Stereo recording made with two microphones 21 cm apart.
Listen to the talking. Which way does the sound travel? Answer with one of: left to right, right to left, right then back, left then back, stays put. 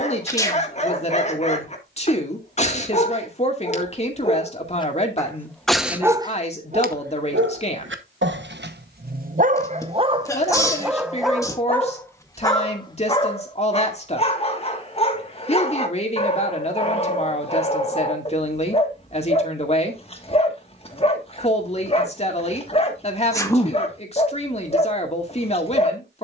stays put.